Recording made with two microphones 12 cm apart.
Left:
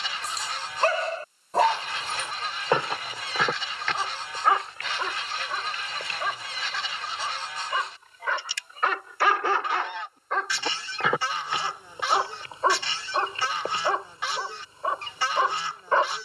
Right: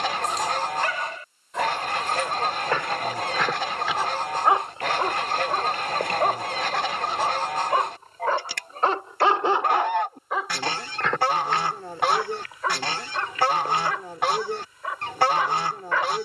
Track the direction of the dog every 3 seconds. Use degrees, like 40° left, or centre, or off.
30° left, 20° right, 40° right, 10° right, 30° left, 30° left.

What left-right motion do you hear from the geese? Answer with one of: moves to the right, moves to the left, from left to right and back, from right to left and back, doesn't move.
doesn't move.